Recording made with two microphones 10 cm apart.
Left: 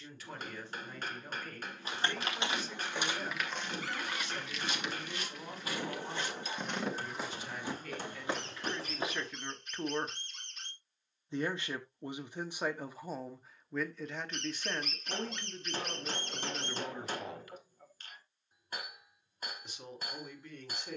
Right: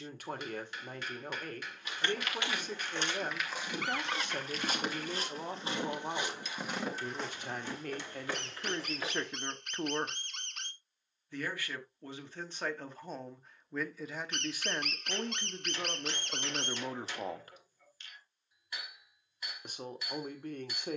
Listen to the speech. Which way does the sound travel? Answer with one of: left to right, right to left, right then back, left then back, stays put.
left then back.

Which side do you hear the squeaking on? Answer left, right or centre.
right.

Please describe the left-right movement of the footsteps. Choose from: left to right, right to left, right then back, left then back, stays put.
right then back.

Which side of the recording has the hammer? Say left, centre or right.
left.